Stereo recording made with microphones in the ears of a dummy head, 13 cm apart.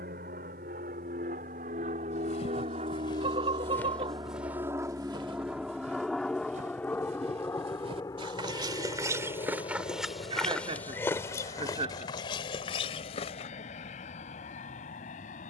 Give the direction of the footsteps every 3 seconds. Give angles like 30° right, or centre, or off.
40° left, 10° right, 40° right, 10° left, 40° left.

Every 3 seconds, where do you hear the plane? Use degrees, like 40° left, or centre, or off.
60° right, 20° right, 20° left, 30° left, 40° left.